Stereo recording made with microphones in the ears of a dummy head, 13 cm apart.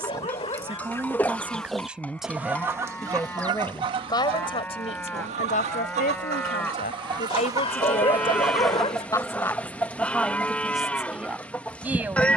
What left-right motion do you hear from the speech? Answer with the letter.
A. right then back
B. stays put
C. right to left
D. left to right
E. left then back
E.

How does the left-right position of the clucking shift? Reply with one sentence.
You can hear the clucking move from left to right and back again.